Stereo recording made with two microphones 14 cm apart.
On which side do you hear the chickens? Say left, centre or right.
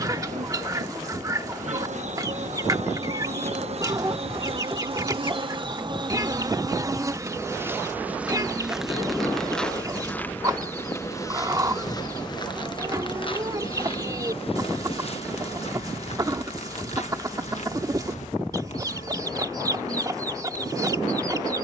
right.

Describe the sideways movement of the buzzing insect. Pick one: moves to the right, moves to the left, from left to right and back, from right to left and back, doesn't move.
moves to the left.